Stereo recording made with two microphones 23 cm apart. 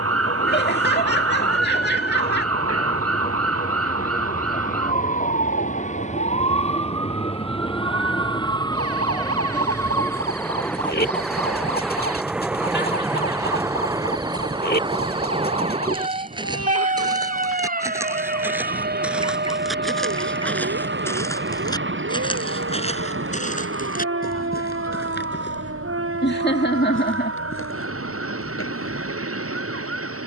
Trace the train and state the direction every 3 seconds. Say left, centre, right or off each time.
left, left, left, centre, centre, right, right, right, right, right.